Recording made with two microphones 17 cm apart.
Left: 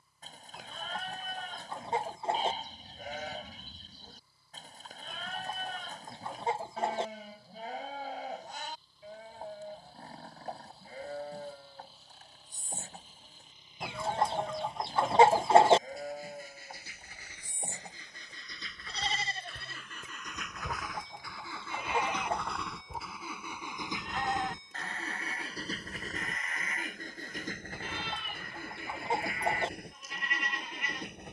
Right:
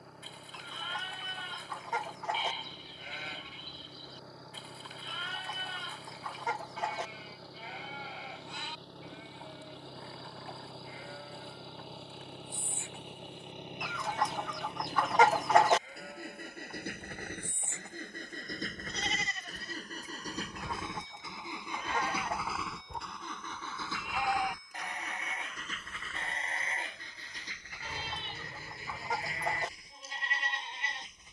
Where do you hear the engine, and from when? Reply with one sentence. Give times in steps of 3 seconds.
You can hear the engine on the right from 0 s, in the centre from 21 s and on the left from 24 s.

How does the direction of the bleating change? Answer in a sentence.
You can hear the bleating go from the left side to the right.